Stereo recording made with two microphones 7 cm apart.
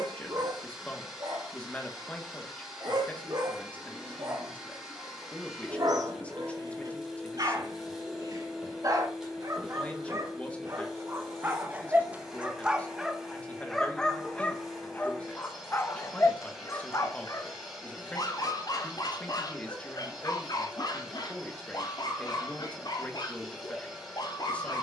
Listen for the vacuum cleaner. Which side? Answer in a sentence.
You can hear the vacuum cleaner in the centre.